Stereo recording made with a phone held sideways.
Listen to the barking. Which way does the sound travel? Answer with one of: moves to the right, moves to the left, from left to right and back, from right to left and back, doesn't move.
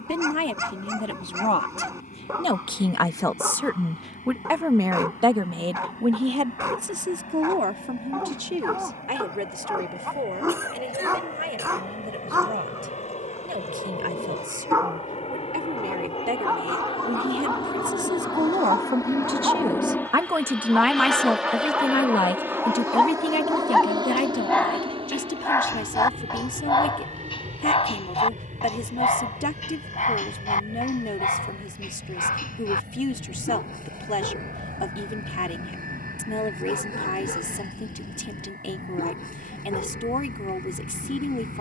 moves to the left.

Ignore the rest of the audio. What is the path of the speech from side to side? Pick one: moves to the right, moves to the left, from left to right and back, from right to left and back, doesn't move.
from left to right and back.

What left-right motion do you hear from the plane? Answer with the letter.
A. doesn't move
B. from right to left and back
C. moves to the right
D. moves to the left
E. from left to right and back
C.